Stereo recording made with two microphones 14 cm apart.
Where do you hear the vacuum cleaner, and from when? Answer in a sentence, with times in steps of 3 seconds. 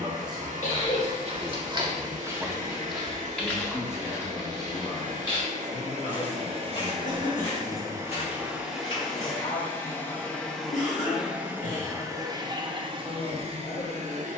In this clip you hear the vacuum cleaner on the right from 0 s, in the centre from 9 s and on the right from 12 s.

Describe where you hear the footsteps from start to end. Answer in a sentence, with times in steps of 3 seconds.
You can hear the footsteps on the right from 0 s, on the left from 3 s and not at all from 12 s.